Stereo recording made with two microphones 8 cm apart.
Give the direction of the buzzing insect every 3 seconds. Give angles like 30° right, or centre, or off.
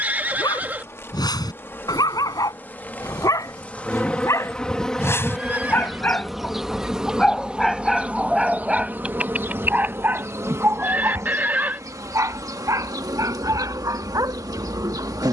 30° left, 10° left, 10° right, 40° right, 50° right.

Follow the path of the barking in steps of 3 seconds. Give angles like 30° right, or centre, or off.
60° left, 40° left, centre, 30° right, 50° right.